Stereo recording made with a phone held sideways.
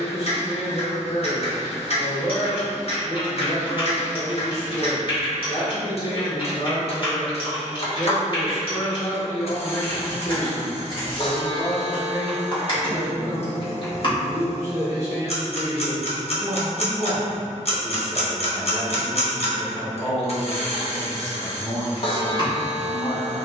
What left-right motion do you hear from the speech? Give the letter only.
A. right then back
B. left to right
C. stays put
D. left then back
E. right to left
A.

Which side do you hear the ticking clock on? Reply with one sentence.
You can hear the ticking clock on the left.